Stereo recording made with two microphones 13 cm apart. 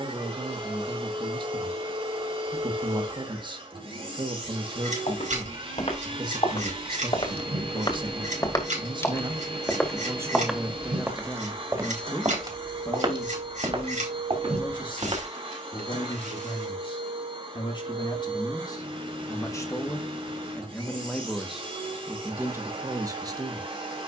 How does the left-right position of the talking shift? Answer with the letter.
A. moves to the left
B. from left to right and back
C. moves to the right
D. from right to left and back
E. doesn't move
D.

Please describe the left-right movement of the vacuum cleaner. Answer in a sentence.
You can hear the vacuum cleaner stay put.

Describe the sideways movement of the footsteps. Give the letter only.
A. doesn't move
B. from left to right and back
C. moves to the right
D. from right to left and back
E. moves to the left
C.